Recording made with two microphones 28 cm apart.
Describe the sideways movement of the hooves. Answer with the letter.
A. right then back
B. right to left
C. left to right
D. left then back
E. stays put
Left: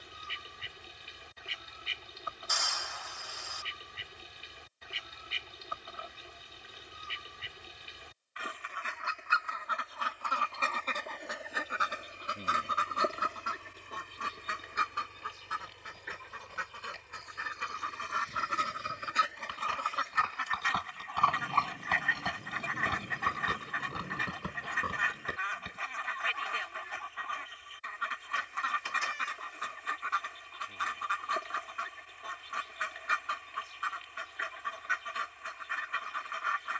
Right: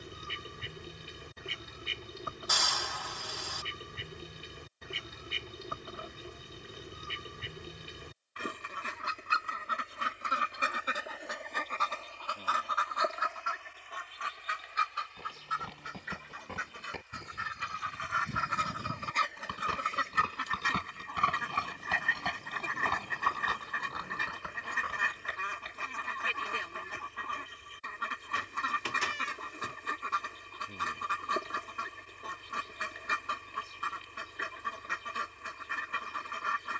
B.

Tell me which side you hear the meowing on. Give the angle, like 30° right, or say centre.
80° right.